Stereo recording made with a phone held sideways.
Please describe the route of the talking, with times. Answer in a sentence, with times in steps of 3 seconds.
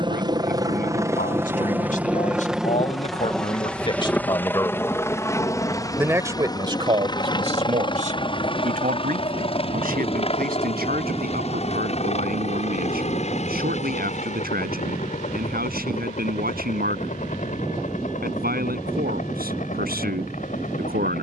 You can hear the talking on the left from 0 s and on the right from 6 s.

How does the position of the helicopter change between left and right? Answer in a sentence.
You can hear the helicopter move to the left.